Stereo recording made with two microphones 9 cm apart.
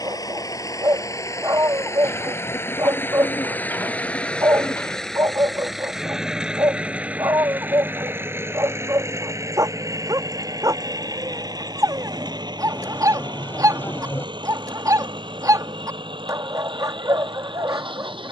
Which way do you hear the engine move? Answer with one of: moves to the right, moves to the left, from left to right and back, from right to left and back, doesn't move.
moves to the right.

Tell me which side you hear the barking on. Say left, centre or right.
right.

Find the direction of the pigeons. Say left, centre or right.
left.